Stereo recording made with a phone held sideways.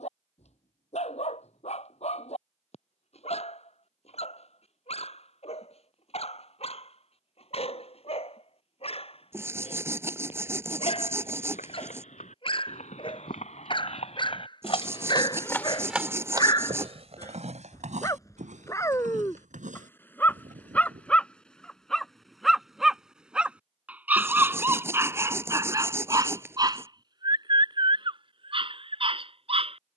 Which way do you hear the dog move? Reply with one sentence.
You can hear the dog move from left to right.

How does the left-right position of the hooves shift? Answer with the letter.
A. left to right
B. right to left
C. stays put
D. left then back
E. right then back
A.